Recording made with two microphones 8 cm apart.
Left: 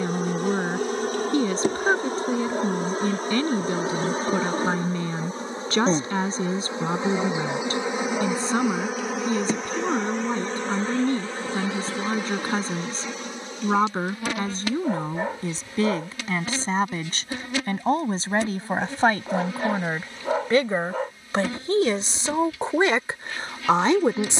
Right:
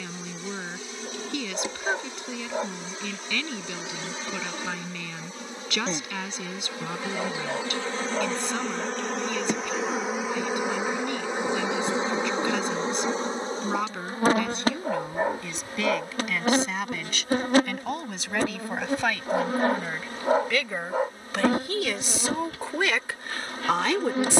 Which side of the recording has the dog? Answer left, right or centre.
centre.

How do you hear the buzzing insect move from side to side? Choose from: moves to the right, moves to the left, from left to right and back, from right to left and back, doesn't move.
moves to the right.